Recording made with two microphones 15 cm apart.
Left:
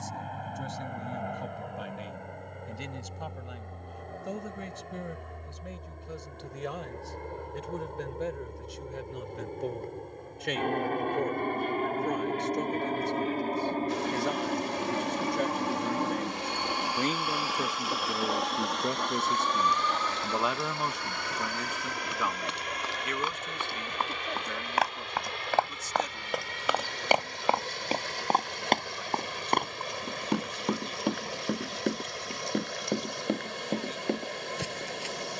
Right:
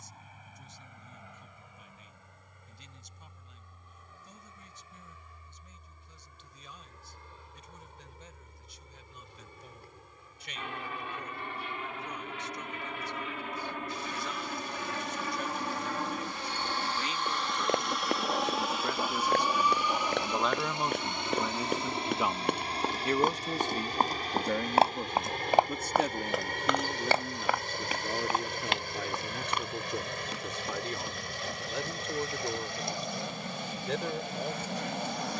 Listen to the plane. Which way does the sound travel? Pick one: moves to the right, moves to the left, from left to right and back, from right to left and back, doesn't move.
moves to the right.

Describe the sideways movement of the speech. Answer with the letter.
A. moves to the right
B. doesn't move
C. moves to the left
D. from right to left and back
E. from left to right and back
A.